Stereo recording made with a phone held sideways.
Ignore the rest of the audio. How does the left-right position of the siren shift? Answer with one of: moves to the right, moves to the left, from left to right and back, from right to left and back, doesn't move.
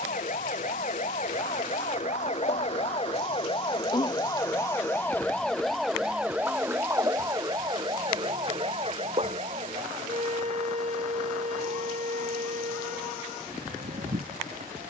moves to the right.